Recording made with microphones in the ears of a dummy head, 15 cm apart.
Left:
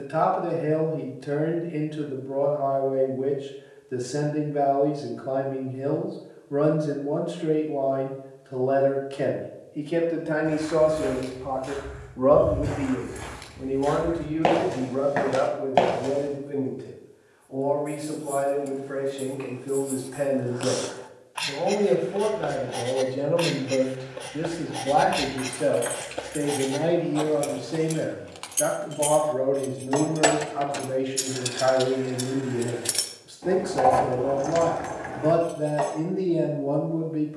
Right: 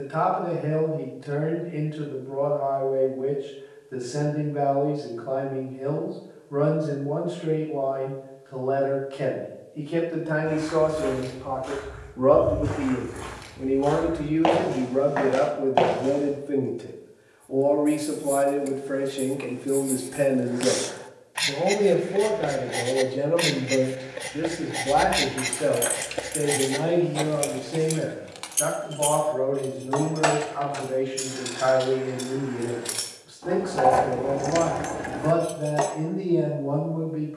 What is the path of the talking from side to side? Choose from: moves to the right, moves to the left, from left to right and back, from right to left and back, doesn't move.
from left to right and back.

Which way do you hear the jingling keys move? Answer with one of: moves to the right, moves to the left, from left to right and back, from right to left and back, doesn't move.
from right to left and back.